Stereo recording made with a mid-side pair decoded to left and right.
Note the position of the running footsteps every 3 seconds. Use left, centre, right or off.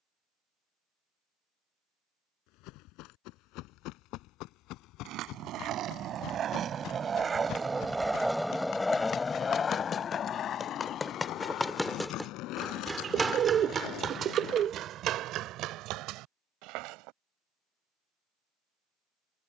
left, left, left, left, right, right, off.